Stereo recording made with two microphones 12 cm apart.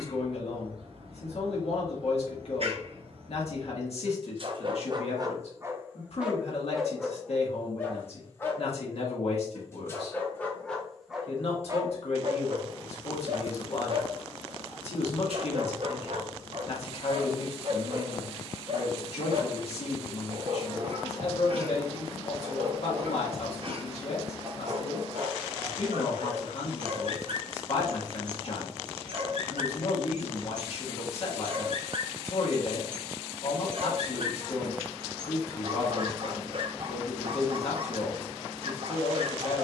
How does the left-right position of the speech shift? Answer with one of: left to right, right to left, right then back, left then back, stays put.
stays put.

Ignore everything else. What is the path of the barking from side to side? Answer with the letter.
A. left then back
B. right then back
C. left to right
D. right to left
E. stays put
A.